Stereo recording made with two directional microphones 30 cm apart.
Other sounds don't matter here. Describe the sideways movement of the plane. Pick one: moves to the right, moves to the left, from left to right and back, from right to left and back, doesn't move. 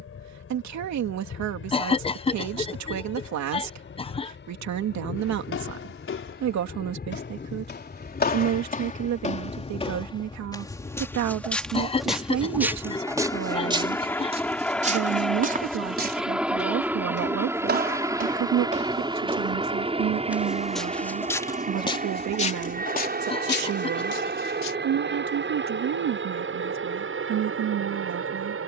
moves to the right.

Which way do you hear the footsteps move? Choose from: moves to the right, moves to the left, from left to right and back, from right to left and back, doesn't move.
from left to right and back.